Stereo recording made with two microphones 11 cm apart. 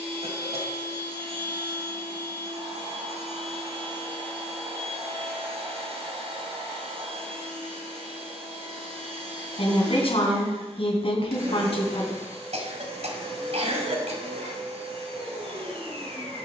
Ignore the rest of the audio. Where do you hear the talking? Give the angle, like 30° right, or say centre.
60° left.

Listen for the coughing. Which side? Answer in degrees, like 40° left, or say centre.
70° right.